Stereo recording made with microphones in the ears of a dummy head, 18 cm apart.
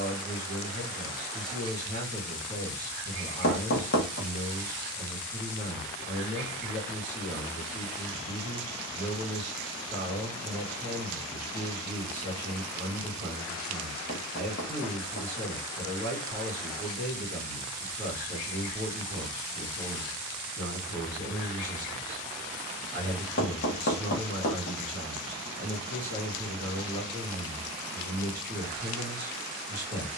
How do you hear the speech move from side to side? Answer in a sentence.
You can hear the speech stay put.